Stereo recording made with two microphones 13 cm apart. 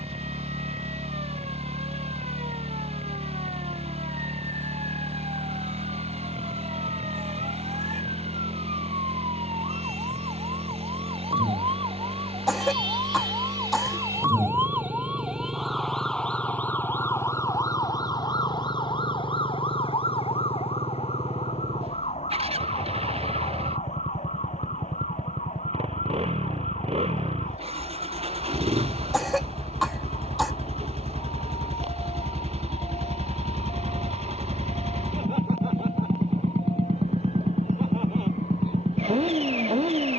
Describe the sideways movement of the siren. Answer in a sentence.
You can hear the siren travel towards the left.